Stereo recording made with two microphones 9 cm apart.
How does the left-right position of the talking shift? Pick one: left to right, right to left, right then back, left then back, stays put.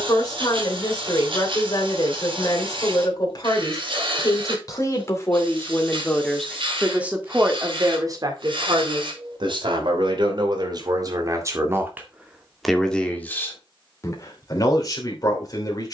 right then back.